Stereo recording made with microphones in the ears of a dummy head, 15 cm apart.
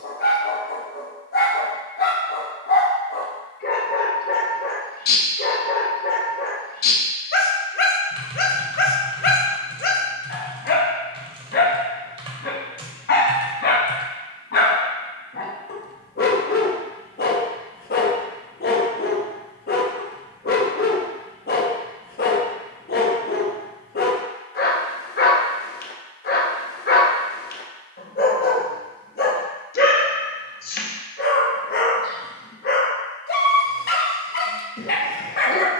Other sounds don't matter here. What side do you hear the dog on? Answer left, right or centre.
left.